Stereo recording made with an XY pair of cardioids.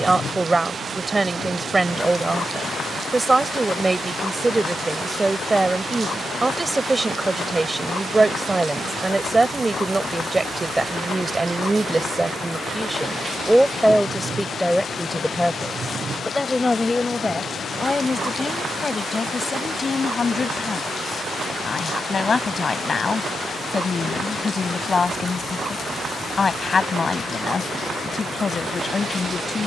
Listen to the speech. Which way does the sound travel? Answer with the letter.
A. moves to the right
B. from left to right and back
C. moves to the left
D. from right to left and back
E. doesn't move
C.